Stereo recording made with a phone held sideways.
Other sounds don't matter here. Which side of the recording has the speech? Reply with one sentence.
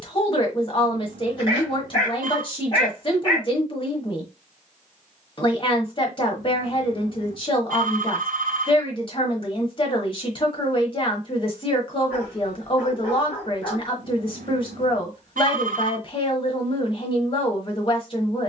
You can hear the speech on the left.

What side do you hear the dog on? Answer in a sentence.
You can hear the dog on the left.